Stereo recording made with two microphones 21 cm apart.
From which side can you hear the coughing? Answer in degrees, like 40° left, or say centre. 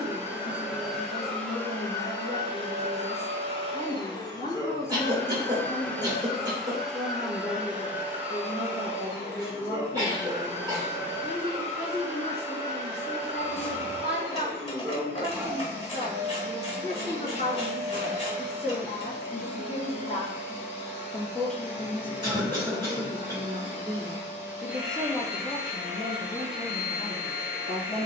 20° right.